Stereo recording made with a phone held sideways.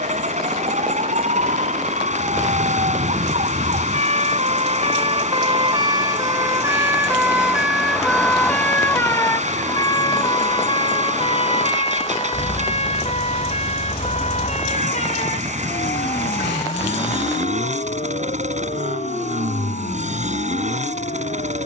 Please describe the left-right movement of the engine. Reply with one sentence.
In this clip you hear the engine stay put.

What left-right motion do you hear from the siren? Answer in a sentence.
You can hear the siren move from right to left.